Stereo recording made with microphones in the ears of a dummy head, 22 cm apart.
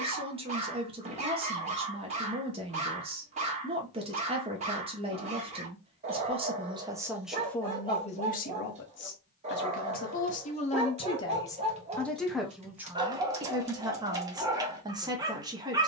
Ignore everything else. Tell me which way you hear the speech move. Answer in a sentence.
You can hear the speech move from right to left and back again.